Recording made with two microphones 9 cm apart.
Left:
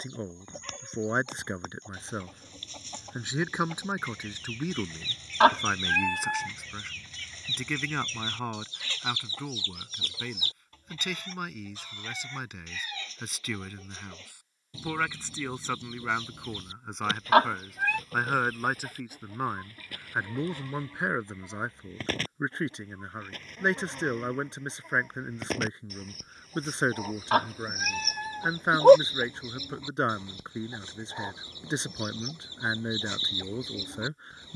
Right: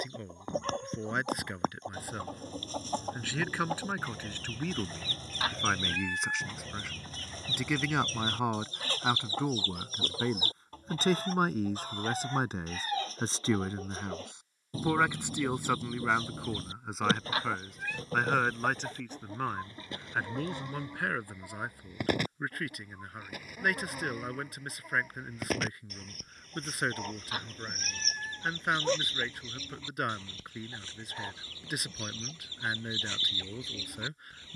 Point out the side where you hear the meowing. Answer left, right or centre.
left.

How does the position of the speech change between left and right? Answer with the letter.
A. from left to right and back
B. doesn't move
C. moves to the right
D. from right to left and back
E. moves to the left
A.